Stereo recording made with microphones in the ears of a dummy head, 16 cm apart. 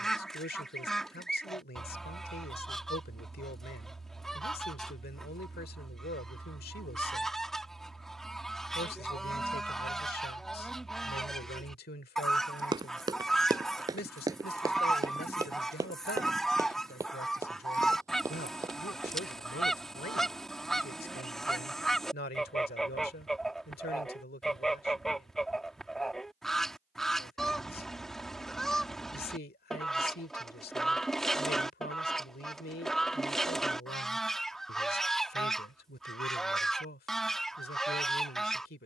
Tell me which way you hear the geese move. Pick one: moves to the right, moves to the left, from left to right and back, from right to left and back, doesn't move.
doesn't move.